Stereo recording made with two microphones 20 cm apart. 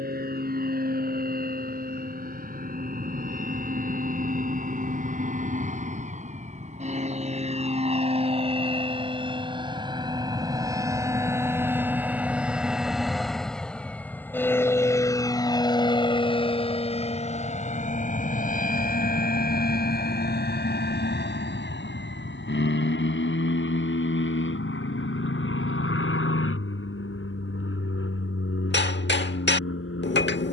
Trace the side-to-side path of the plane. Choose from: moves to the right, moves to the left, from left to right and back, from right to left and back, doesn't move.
moves to the left.